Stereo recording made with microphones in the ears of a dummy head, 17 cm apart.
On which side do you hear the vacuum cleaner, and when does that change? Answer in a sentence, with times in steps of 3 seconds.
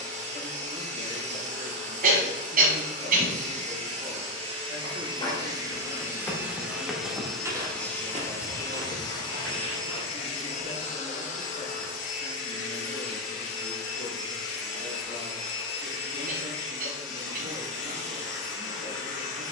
You can hear the vacuum cleaner on the right from 0 s, in the centre from 6 s and on the left from 9 s.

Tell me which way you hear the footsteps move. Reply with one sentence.
You can hear the footsteps move from left to right.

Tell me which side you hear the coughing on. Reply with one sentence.
You can hear the coughing on the right.